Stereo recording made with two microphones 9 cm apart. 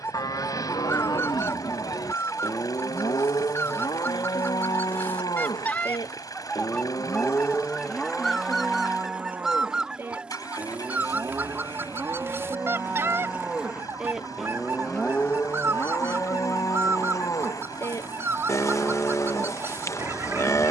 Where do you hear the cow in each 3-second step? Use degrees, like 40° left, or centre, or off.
40° left, 40° left, 20° left, 20° right, 10° right, 30° left, 30° left.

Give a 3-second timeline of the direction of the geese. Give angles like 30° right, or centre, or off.
30° left, 20° left, 10° left, 10° right, 30° right, 30° right, 30° right.